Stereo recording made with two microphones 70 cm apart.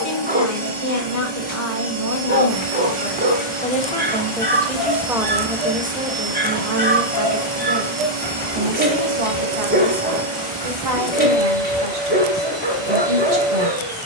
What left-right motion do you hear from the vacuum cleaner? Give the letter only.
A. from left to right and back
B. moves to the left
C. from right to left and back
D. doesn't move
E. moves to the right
D.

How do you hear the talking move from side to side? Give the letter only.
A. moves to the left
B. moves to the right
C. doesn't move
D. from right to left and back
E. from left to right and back
B.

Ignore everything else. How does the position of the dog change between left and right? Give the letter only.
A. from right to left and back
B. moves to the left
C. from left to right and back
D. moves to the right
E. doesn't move
E.